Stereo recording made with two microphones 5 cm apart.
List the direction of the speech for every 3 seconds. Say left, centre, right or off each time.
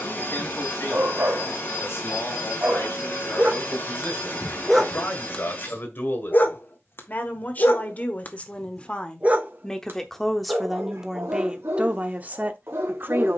left, left, left, centre, right.